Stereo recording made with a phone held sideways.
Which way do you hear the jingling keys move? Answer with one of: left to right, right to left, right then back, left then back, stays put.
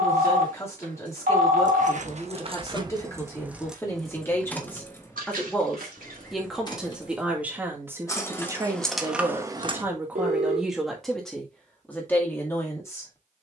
left then back.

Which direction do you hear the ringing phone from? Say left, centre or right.
right.